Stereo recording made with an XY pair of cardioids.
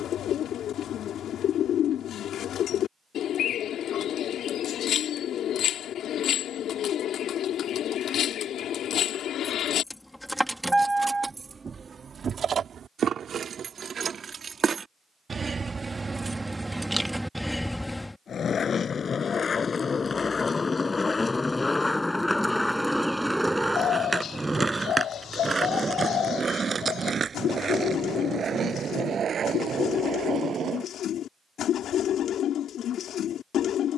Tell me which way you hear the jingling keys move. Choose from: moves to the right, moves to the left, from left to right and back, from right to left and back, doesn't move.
from left to right and back.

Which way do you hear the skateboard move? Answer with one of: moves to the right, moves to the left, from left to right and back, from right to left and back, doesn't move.
moves to the right.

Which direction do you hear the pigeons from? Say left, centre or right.
left.